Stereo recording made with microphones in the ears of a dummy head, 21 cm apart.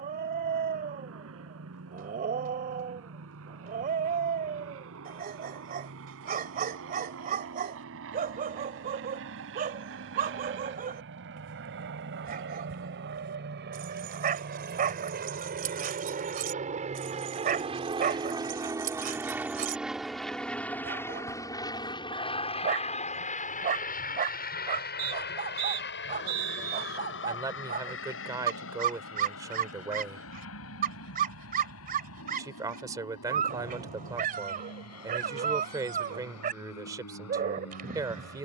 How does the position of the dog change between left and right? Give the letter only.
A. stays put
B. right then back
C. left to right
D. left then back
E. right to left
A.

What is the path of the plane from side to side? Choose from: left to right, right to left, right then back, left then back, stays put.
right to left.